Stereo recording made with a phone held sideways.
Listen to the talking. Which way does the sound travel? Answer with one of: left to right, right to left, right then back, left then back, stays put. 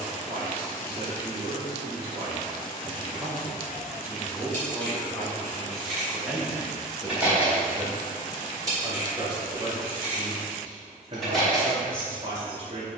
left then back.